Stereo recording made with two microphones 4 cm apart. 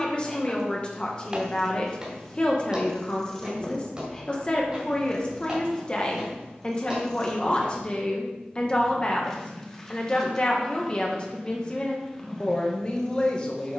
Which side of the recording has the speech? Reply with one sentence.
You can hear the speech on the left.